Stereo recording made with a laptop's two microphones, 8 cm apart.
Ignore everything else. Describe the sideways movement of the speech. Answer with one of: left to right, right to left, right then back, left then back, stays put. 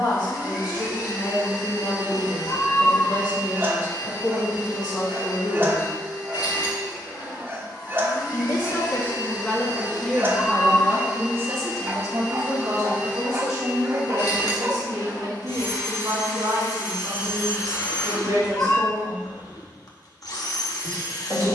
left to right.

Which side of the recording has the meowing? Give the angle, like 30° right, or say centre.
30° left.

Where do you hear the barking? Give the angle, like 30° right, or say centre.
30° right.